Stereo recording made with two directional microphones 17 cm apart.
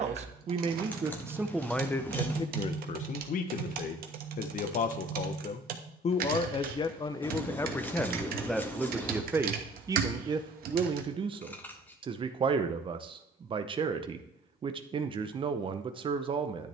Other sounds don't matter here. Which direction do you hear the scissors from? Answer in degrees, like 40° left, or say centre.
10° left.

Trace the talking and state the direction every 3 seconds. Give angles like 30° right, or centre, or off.
centre, 50° left, 20° left, 20° right, 30° right, 30° right.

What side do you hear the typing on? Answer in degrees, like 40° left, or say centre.
60° right.